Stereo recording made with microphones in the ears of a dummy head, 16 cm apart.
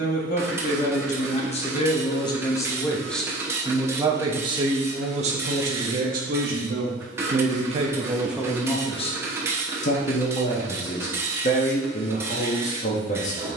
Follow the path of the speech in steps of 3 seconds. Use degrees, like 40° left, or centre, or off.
30° left, 30° right, 30° right, 40° left, 40° left.